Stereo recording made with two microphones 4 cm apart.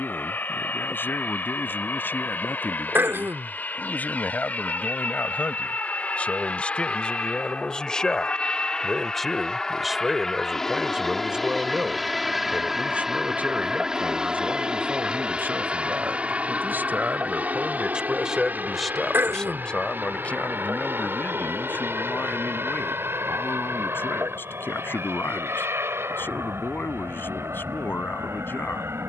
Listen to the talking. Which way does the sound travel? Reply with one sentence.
You can hear the talking go right and come back.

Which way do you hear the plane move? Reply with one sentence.
In this clip you hear the plane move from left to right.